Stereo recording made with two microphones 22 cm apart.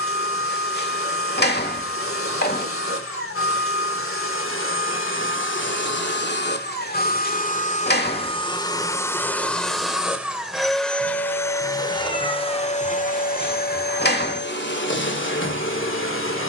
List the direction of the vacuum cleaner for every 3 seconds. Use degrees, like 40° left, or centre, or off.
70° left, 70° left, 40° left, centre, 40° left, 60° left.